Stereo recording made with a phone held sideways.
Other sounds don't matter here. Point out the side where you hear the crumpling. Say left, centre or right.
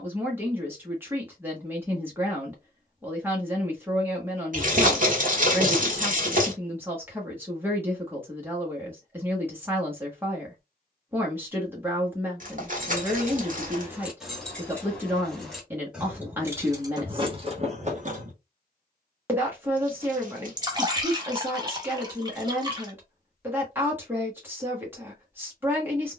right.